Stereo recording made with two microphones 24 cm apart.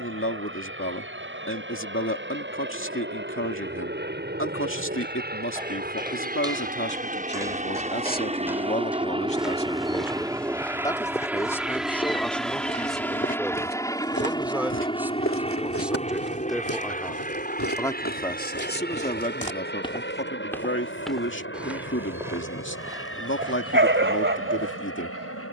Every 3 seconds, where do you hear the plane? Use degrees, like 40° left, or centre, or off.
60° right, 50° right, 30° right, 10° right, 10° left, 30° left, 40° left, 50° left, 60° left.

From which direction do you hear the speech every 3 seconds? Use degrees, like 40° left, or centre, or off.
60° left, 60° left, 40° left, 20° left, centre, centre, 40° left, 50° left, 50° left.